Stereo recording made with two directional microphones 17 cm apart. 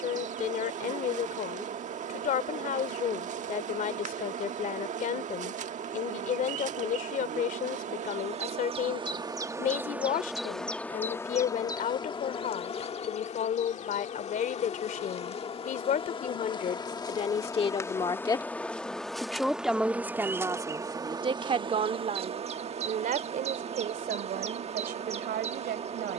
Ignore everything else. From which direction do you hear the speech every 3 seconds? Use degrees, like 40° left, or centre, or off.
50° left, 50° left, 50° left, 50° left, 50° left, 40° left, centre, 40° right, 60° right.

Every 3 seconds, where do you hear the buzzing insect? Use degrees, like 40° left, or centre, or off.
50° right, 50° right, 40° right, centre, 40° left, 30° left, centre, 30° right, 40° right.